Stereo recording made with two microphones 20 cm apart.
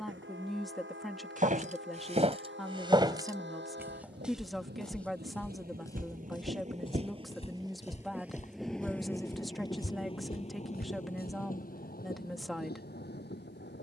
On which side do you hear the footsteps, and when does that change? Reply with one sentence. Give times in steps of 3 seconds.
You can hear the footsteps on the right from 0 s, in the centre from 3 s, on the left from 6 s and not at all from 12 s.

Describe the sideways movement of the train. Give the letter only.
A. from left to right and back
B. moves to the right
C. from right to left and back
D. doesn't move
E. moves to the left
E.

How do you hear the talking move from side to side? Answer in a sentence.
In this clip you hear the talking stay in one place.